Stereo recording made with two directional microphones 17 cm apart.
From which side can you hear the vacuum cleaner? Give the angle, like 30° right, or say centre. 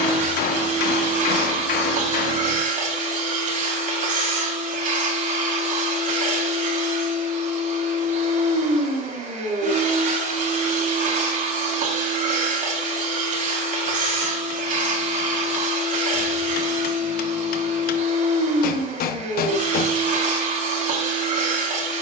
60° right.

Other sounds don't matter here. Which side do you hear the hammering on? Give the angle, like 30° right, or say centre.
70° left.